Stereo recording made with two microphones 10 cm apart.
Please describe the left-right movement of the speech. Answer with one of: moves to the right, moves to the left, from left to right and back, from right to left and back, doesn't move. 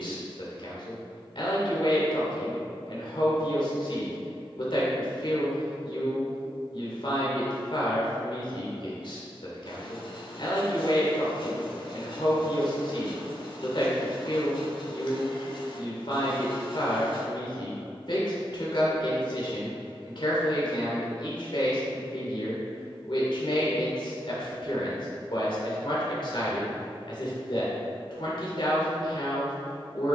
doesn't move.